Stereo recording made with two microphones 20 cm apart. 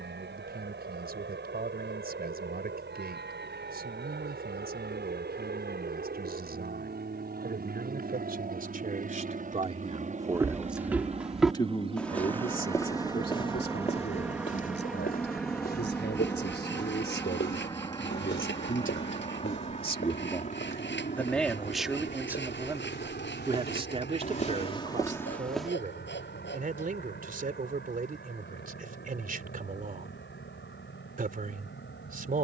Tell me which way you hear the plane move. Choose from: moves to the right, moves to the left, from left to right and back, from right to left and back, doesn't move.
moves to the left.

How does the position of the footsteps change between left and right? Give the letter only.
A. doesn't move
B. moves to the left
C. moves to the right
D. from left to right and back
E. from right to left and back
E.